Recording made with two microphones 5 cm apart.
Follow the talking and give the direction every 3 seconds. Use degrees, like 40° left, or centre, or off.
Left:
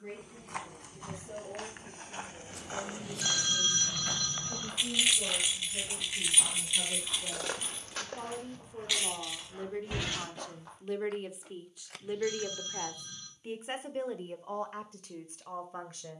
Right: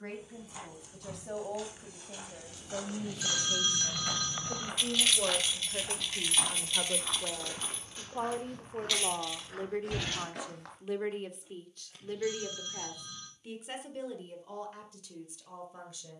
70° right, 70° right, 50° right, 10° right, 30° left, 50° left.